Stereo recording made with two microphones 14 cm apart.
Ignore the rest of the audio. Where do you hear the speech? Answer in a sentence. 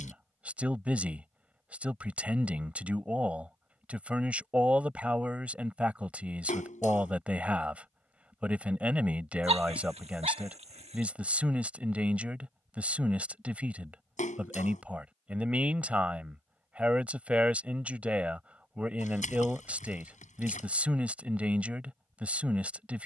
You can hear the speech in the centre.